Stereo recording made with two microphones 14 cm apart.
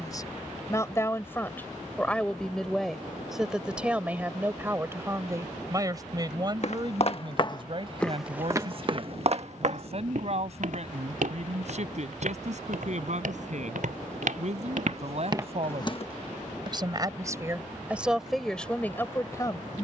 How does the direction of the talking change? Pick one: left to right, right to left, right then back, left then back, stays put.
right then back.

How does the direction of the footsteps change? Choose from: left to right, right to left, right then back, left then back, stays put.
right then back.